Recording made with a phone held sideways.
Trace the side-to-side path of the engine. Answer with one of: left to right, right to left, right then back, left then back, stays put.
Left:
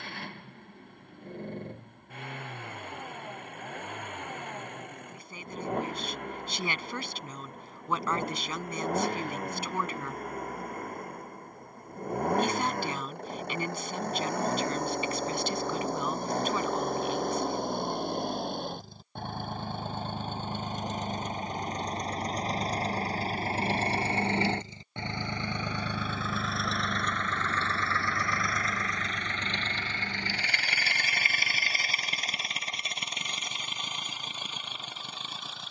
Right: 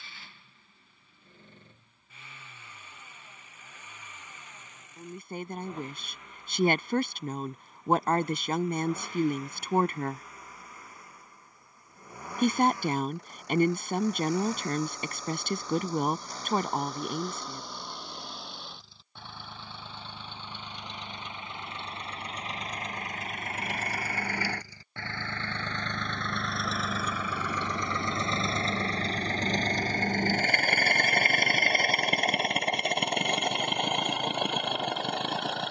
left to right.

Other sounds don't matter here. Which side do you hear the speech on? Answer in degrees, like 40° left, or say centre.
50° right.